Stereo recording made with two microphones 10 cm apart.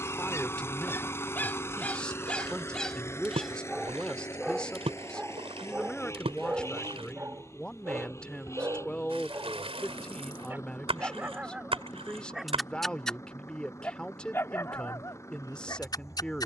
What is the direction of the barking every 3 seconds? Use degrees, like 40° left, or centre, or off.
20° left, 10° right, 20° right, 20° right, 20° left, 40° left.